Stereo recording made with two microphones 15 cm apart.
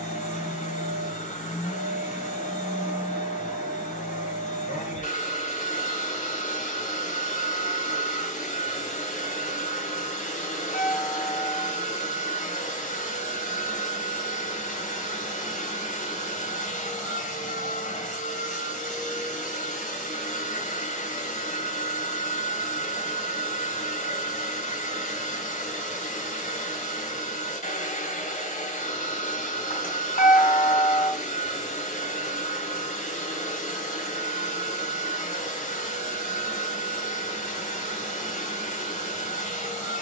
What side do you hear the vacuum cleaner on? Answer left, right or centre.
left.